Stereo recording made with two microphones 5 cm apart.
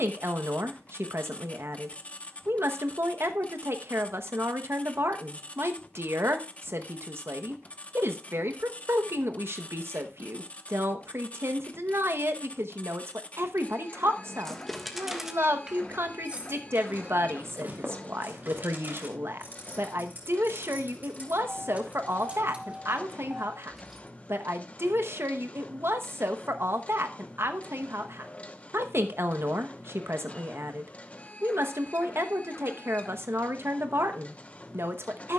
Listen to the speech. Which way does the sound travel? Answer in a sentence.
You can hear the speech stay in one place.